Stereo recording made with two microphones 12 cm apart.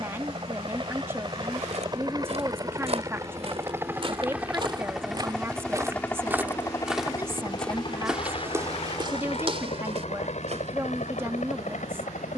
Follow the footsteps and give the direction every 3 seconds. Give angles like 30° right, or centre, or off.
60° right, 40° right, 10° right, 50° right.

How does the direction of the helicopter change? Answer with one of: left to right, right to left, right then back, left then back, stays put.
right to left.